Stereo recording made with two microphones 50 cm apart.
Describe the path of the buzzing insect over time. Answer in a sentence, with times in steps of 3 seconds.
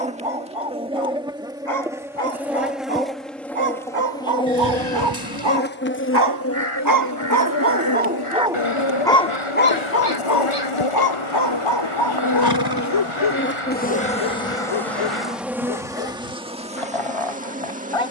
In this clip you hear the buzzing insect in the centre from 0 s, on the left from 6 s and in the centre from 15 s.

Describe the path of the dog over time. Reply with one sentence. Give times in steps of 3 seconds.
You can hear the dog on the right from 0 s and on the left from 9 s.